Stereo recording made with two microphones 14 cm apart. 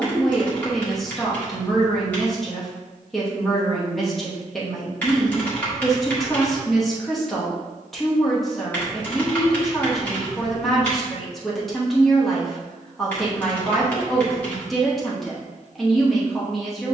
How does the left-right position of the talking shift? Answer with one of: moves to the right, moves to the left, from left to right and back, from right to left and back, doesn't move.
doesn't move.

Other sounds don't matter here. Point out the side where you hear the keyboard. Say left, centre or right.
centre.